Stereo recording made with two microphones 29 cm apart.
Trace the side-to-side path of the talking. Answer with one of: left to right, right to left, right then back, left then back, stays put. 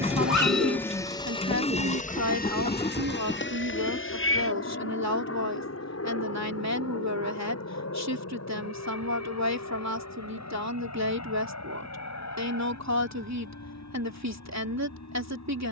stays put.